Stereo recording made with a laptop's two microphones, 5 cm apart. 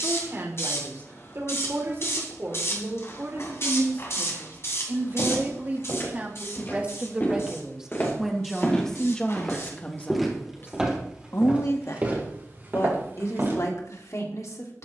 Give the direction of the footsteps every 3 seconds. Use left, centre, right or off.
off, left, left, centre, right.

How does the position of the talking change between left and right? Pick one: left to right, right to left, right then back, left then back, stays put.
right to left.